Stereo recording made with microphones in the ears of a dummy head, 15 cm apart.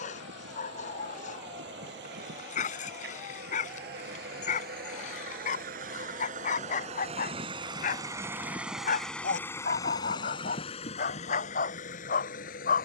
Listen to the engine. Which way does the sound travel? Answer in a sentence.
You can hear the engine go from the right side to the left.